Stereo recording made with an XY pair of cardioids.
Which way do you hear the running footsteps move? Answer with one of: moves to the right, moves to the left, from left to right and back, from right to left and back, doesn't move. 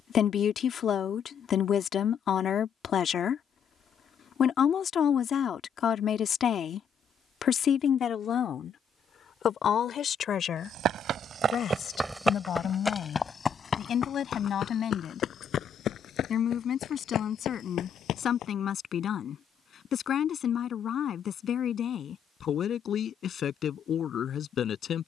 moves to the left.